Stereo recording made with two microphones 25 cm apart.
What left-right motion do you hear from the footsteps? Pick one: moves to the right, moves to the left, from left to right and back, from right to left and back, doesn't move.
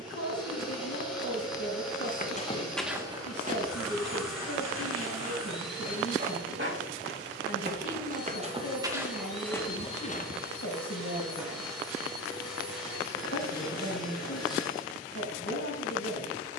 from left to right and back.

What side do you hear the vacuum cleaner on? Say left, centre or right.
centre.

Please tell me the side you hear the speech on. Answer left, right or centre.
left.